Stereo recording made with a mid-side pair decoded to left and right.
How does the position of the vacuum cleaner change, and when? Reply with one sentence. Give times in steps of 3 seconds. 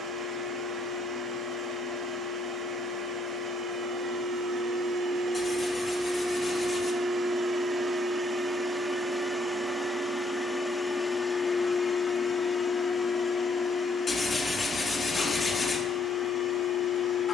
In this clip you hear the vacuum cleaner on the right from 0 s, in the centre from 9 s and on the left from 12 s.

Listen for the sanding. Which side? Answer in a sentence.
You can hear the sanding on the left.